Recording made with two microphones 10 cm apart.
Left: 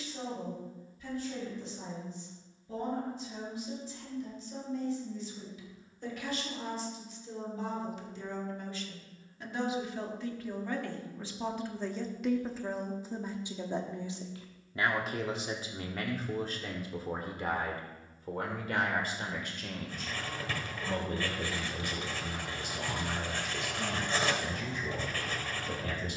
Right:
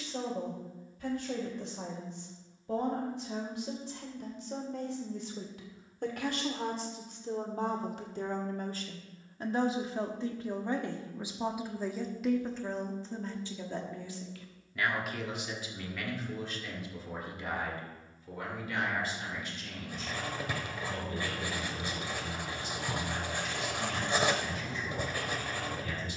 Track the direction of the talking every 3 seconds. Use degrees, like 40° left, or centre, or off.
70° right, 70° right, 50° right, 20° right, 10° left, 40° left, 50° left, 60° left, 60° left.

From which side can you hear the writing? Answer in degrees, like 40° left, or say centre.
20° right.